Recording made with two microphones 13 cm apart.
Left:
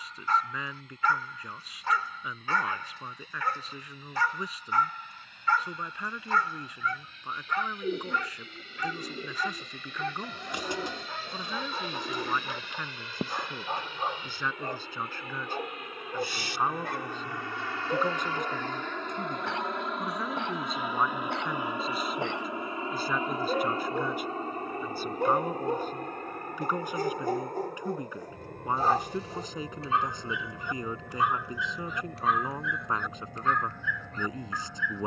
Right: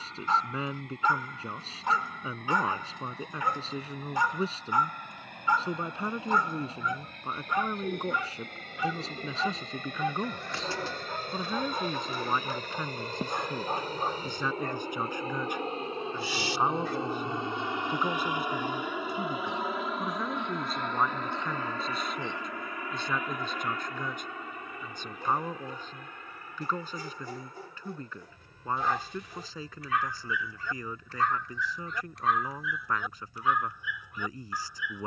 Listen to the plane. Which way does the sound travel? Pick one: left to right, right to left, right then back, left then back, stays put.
right to left.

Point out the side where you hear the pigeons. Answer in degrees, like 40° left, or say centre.
20° left.